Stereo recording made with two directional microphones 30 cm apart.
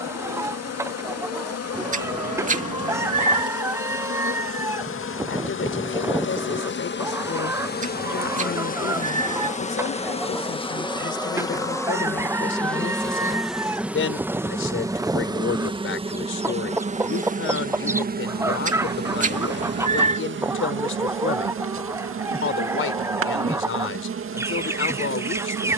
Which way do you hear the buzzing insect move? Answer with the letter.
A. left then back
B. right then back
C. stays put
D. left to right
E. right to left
D.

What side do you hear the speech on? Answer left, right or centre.
left.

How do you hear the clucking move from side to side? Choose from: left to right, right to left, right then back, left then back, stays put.
stays put.